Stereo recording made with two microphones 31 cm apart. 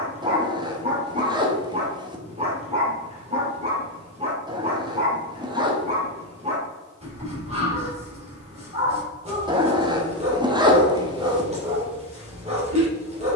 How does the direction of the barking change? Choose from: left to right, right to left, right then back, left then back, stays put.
stays put.